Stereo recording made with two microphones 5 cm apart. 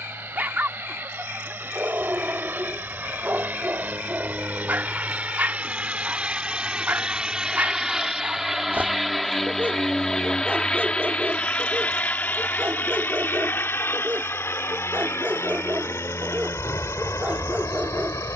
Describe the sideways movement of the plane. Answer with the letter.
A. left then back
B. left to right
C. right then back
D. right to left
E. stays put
D.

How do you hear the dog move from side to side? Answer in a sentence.
You can hear the dog stay in one place.